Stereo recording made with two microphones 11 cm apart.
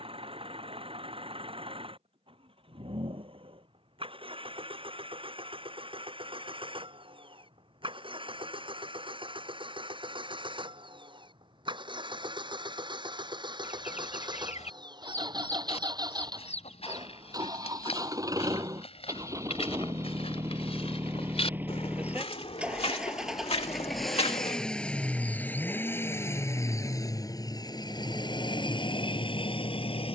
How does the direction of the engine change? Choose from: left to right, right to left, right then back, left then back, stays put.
right to left.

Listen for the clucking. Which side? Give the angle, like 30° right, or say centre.
90° left.